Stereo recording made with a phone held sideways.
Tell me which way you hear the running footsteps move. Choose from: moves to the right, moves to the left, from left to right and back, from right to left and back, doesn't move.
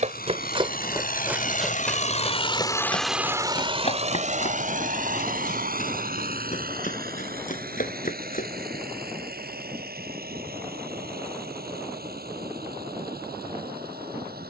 moves to the left.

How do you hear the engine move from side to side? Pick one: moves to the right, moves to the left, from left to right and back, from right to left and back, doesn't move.
moves to the right.